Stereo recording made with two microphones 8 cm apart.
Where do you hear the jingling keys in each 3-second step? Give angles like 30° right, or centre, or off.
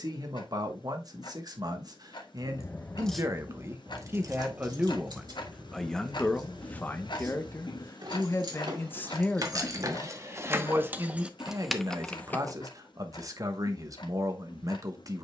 30° left, 40° right, 60° right, 30° right, 20° left.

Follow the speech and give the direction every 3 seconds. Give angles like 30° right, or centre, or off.
50° right, 20° right, 20° left, 20° right, 40° right.